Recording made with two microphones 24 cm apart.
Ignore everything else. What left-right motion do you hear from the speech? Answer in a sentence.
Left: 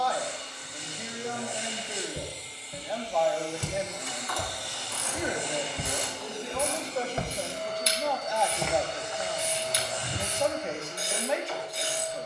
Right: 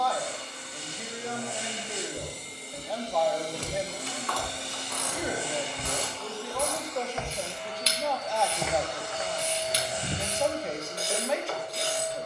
You can hear the speech stay put.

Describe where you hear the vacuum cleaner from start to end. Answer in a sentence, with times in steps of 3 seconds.
You can hear the vacuum cleaner on the right from 0 s, on the left from 6 s and on the right from 9 s.